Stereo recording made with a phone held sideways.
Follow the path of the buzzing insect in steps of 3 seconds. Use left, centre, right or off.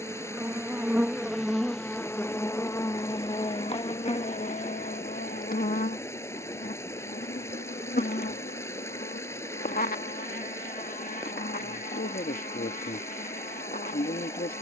centre, left, left, left, left.